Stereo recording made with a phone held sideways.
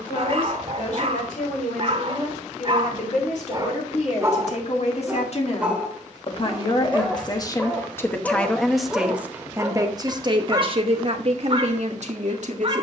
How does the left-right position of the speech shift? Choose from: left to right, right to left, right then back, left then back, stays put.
left to right.